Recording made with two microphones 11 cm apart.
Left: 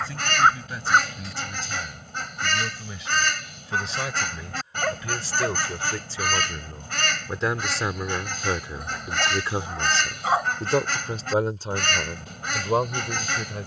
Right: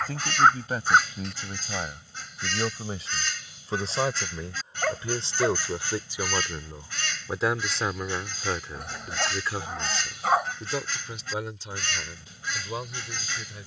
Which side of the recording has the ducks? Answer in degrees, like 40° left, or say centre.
70° left.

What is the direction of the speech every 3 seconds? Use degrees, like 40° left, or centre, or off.
50° right, 30° right, centre, 40° left, 60° left.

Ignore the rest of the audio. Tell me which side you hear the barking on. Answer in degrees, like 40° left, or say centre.
centre.